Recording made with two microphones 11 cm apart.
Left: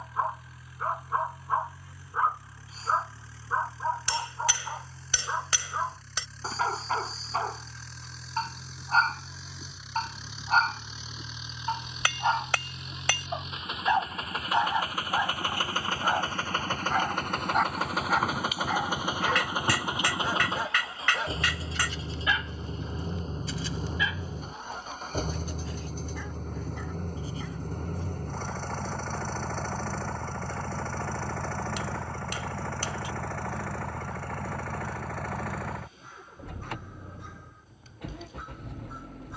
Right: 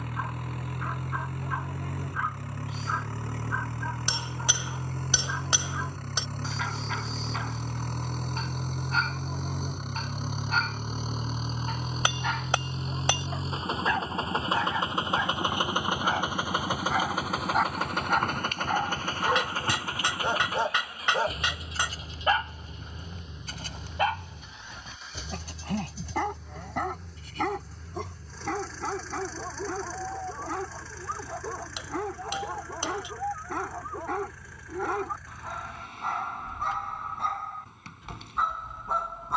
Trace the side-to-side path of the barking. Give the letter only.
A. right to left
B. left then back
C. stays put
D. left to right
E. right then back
D.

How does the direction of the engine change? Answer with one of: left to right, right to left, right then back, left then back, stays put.
right to left.